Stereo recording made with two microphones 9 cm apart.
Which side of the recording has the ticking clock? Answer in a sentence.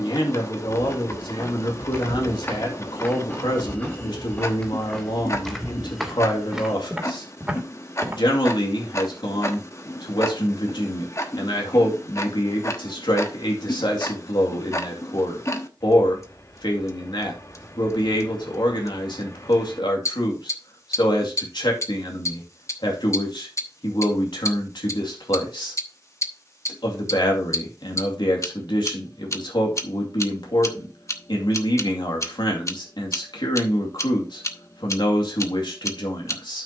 You can hear the ticking clock on the left.